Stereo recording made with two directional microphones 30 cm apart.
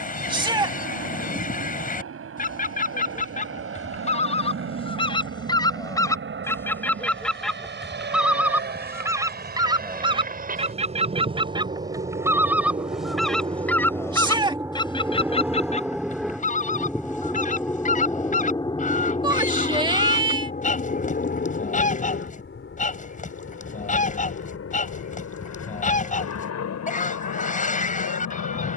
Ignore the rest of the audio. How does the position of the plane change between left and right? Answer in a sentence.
In this clip you hear the plane move from right to left.